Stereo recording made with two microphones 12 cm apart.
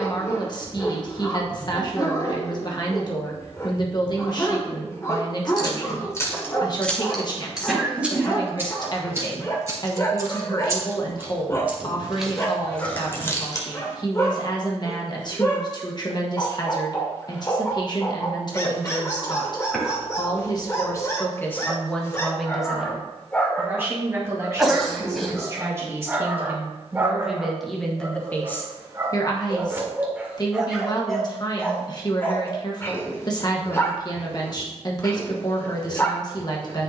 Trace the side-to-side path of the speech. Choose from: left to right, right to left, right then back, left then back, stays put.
right then back.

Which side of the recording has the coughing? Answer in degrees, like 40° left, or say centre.
centre.